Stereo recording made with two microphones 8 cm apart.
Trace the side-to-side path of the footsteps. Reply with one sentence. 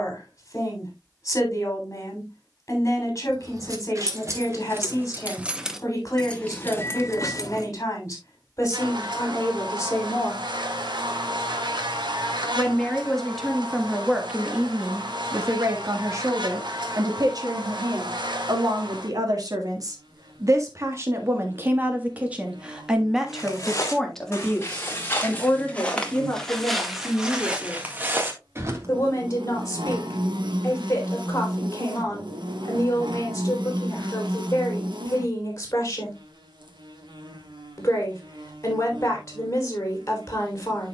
In this clip you hear the footsteps move from left to right.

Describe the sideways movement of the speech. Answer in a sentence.
You can hear the speech move from left to right and back again.